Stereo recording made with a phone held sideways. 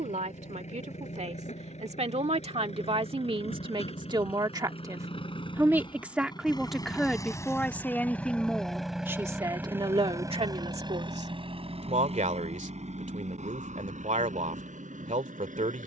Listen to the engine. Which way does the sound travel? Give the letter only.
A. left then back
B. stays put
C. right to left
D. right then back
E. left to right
E.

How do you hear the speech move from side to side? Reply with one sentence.
You can hear the speech move from right to left and back again.